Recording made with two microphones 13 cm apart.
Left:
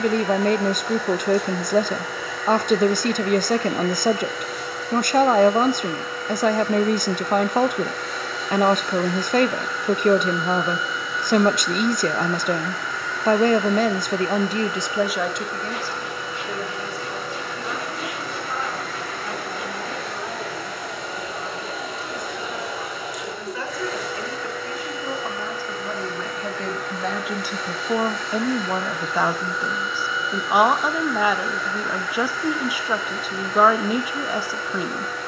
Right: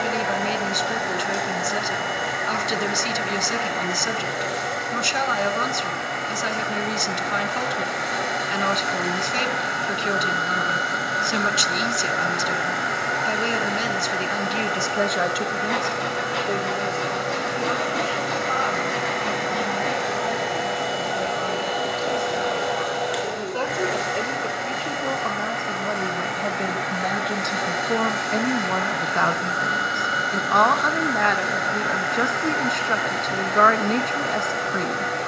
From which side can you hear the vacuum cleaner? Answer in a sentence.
You can hear the vacuum cleaner on the right.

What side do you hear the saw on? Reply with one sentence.
In this clip you hear the saw on the right.